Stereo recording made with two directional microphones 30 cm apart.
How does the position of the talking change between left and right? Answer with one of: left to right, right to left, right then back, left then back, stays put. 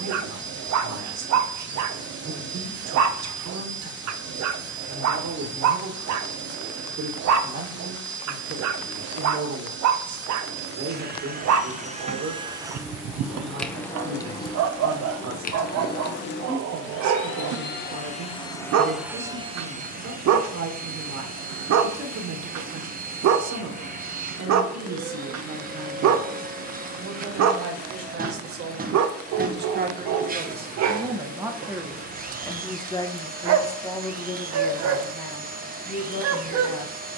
right to left.